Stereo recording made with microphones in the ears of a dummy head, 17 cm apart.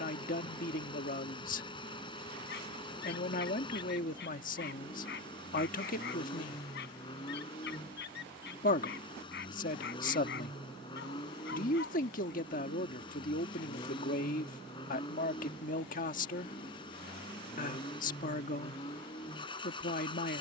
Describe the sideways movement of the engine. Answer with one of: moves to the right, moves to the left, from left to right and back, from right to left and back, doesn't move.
doesn't move.